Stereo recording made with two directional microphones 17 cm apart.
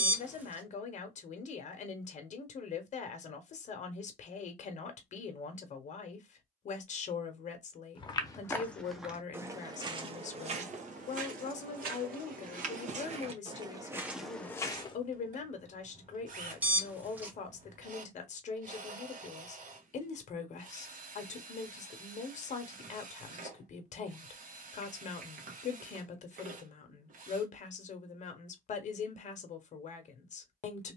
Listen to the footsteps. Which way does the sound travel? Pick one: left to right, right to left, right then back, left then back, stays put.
right then back.